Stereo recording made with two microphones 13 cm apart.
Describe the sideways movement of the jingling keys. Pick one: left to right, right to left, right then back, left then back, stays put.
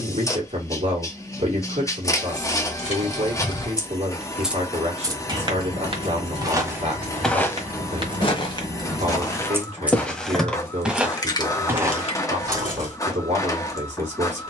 right then back.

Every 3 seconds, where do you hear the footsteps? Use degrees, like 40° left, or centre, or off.
off, off, 10° left, centre, 30° right.